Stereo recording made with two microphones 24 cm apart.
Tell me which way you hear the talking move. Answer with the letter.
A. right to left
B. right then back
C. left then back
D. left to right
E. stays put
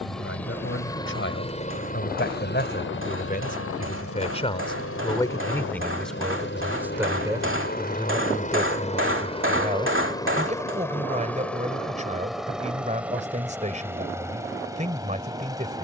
D.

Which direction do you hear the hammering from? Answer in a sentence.
In this clip you hear the hammering on the right.